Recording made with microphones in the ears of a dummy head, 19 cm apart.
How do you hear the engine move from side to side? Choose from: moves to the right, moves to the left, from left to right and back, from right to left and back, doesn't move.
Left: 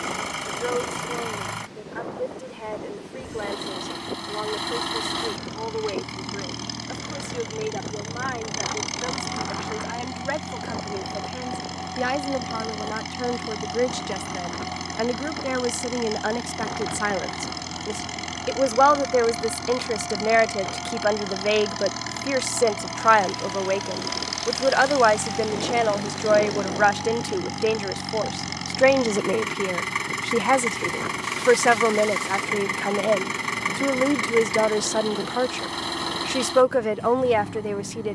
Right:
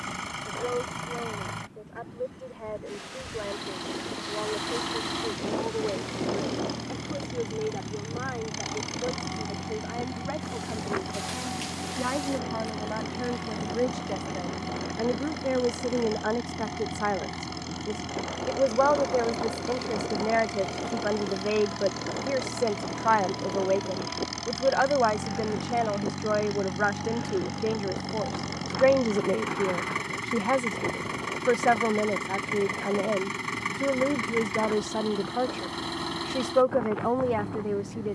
doesn't move.